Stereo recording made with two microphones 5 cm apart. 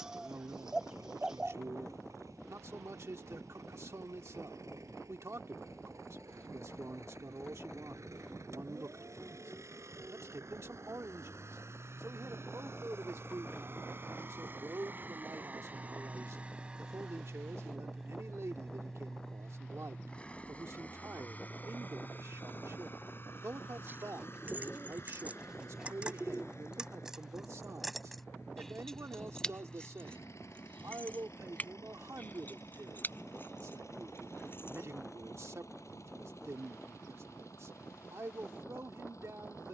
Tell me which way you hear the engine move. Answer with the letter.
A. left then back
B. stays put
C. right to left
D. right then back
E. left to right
C.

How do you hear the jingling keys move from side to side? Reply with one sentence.
You can hear the jingling keys go from the right side to the left.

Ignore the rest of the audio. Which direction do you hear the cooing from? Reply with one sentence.
In this clip you hear the cooing in the centre.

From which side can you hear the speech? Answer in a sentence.
You can hear the speech on the right.